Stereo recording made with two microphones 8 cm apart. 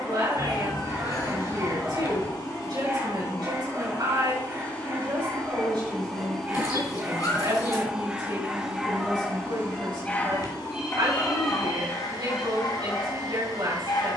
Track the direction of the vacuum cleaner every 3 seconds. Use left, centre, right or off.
left, left, centre, right, right.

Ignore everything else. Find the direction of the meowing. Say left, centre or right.
left.